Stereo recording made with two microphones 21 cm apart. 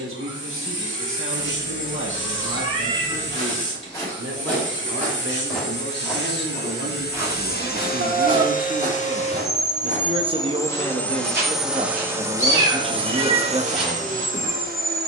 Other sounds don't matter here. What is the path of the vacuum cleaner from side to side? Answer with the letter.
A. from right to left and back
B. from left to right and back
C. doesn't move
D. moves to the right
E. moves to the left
D.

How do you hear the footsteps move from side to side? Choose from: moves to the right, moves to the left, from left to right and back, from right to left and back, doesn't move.
from left to right and back.